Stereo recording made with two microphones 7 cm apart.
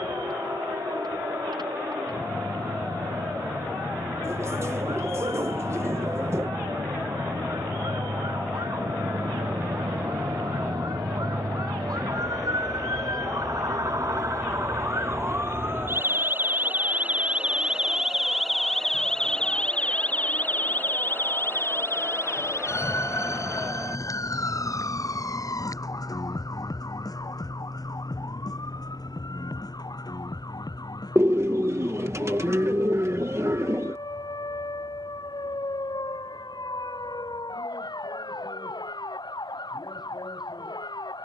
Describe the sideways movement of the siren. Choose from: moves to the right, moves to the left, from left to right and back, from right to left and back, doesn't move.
moves to the left.